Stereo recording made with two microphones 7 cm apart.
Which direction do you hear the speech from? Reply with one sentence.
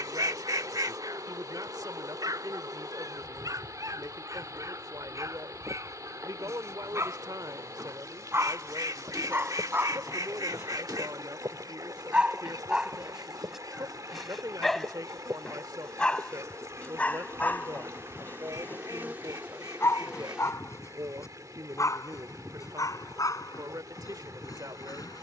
You can hear the speech on the right.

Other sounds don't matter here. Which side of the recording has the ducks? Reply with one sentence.
You can hear the ducks on the right.